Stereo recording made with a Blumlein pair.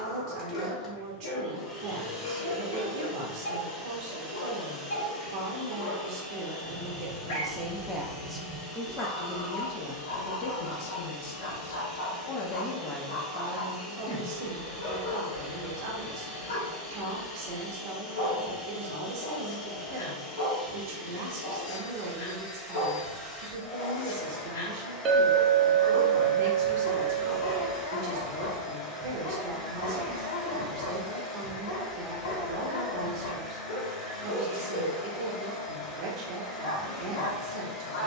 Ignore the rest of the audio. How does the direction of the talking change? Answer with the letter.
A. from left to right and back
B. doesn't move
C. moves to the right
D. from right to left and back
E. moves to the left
D.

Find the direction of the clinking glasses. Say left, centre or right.
right.